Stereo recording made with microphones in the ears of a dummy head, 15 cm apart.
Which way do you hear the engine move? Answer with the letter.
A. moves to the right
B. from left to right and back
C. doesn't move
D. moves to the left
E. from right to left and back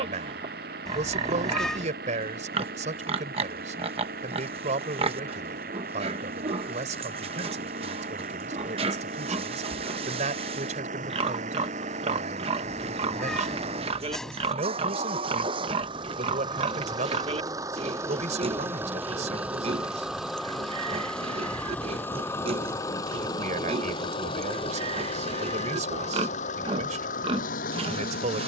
D.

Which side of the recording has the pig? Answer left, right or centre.
right.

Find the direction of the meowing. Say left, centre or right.
centre.